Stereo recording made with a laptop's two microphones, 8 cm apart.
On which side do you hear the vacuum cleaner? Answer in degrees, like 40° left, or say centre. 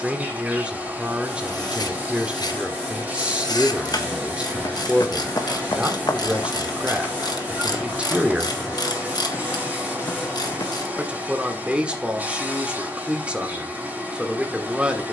20° right.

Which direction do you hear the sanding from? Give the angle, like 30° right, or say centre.
10° left.